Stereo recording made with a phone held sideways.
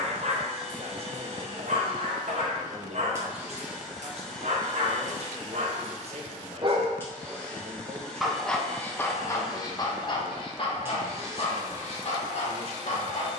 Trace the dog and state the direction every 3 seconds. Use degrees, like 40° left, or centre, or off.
60° right, 60° right, 10° right, 30° left, 50° left.